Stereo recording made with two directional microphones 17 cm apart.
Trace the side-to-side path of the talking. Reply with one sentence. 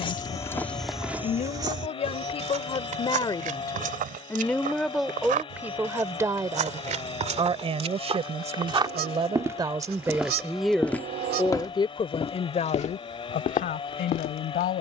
In this clip you hear the talking move from left to right and back again.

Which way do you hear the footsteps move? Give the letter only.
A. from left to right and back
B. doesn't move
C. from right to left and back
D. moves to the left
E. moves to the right
A.